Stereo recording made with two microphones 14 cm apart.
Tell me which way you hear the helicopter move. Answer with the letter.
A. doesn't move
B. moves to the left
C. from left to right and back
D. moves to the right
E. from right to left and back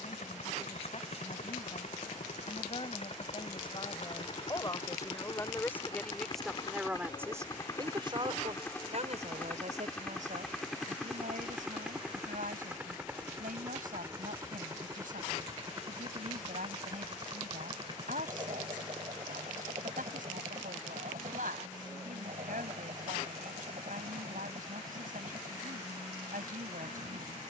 D.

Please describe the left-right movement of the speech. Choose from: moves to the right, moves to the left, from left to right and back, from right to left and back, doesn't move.
moves to the right.